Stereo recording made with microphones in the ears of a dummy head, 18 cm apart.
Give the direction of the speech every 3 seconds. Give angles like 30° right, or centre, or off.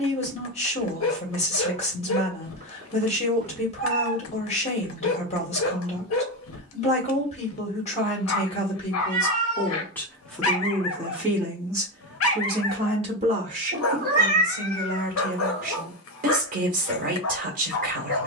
30° left, 30° left, 30° left, centre, 30° right, 40° right.